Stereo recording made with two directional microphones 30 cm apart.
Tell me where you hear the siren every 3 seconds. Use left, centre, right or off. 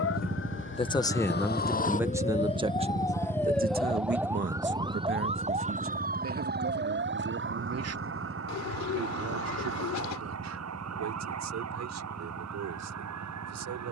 left, centre, right, right, right.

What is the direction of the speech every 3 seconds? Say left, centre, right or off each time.
centre, right, right, right, right.